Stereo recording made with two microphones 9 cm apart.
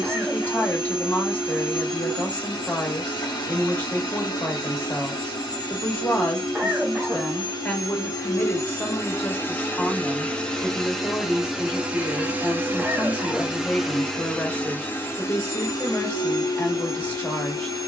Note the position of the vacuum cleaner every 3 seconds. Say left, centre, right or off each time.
left, left, left, centre, centre, left.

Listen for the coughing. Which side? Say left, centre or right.
centre.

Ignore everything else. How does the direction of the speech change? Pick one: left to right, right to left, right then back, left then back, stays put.
stays put.